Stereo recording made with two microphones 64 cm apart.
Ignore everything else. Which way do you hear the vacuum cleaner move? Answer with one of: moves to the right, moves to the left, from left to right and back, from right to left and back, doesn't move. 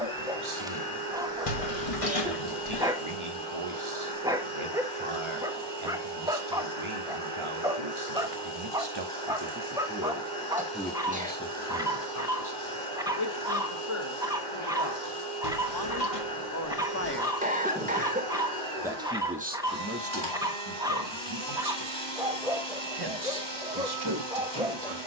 doesn't move.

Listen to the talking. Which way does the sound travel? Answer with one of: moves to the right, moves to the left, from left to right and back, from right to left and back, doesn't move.
from right to left and back.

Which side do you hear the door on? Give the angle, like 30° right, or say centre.
60° left.